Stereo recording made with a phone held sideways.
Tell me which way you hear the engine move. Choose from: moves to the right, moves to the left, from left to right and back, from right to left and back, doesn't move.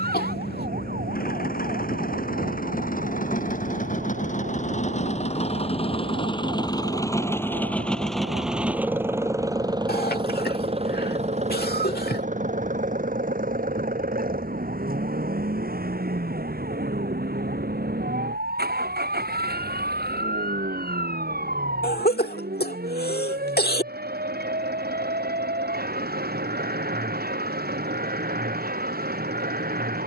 moves to the right.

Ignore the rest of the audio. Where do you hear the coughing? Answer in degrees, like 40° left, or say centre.
70° left.